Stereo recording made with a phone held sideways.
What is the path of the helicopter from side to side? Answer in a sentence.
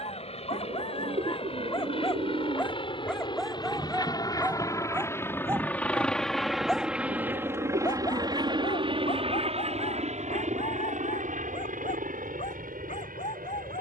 You can hear the helicopter travel towards the right.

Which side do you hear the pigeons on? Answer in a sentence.
In this clip you hear the pigeons on the right.